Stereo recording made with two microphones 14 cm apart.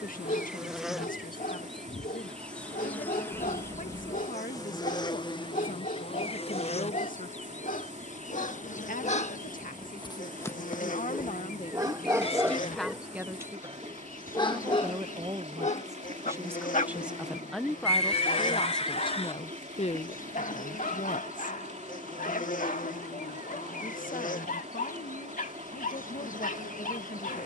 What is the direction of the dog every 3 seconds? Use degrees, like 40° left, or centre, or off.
80° left, 80° left, 80° left, 20° left, 10° left, 60° left, 80° left, 80° left, 80° left.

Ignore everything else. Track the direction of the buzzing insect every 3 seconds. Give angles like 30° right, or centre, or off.
centre, 30° left, 60° left, 70° left, 70° left, 70° left, 70° left, 70° left, 70° left.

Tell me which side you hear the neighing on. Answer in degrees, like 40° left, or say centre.
50° left.